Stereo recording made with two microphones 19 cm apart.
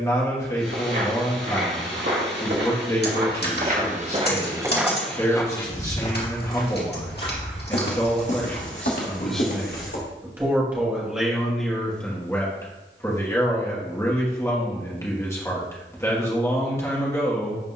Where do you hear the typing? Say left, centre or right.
left.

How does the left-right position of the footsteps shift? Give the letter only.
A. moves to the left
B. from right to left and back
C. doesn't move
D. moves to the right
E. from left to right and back
A.